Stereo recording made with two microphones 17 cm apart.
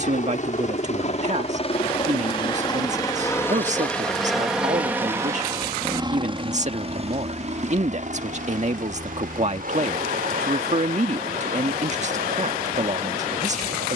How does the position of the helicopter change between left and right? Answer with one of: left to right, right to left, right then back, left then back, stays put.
left to right.